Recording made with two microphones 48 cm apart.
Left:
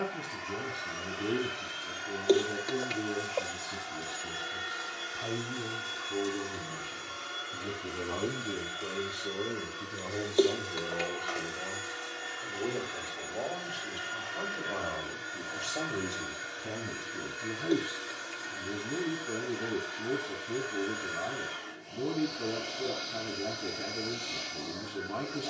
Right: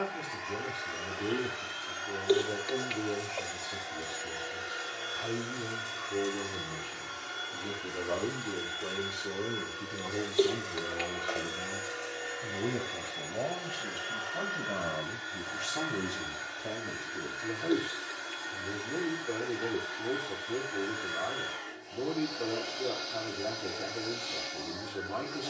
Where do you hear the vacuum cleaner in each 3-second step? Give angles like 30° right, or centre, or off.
50° left, 20° left, centre, 10° left, 40° left, 50° left, 50° left, 50° left, 50° left.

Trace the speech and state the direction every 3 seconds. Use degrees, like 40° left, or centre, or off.
30° left, 30° left, 20° left, 10° right, 50° right, centre, 30° left, 30° left, 30° left.